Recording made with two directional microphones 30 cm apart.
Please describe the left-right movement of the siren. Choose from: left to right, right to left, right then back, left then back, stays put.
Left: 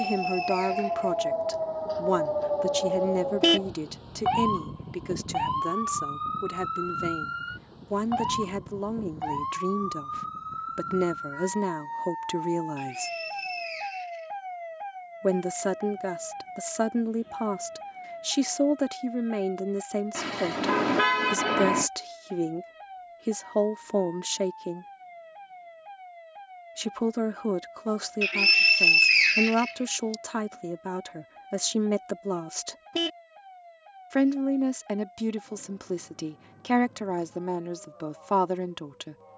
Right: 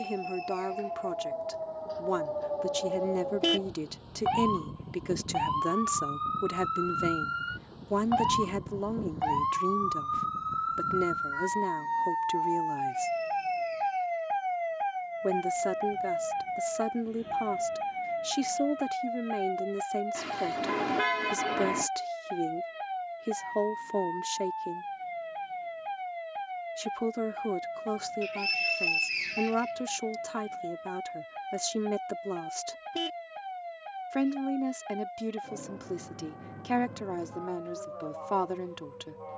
left to right.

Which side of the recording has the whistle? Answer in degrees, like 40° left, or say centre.
70° left.